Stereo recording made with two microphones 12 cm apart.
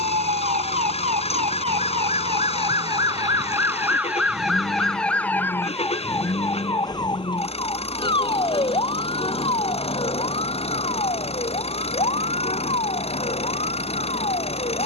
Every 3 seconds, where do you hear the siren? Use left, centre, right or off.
right, centre, left, left, left.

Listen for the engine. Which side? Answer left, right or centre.
left.